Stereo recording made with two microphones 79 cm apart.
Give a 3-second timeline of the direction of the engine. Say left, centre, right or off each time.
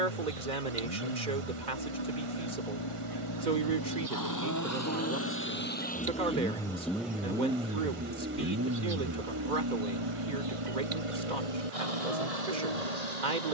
left, left, centre, right, right.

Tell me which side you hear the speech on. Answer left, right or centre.
right.